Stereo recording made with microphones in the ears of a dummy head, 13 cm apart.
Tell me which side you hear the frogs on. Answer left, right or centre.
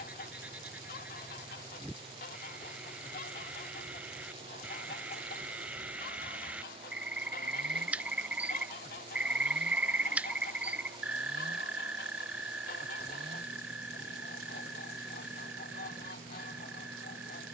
centre.